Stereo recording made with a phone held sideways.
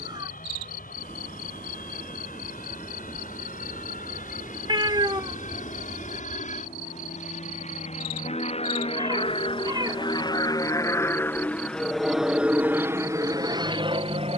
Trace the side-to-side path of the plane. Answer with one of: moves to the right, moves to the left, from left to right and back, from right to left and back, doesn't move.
moves to the right.